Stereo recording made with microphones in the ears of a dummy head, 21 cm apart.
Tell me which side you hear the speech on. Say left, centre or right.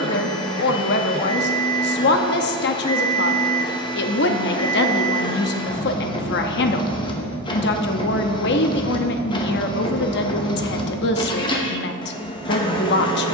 left.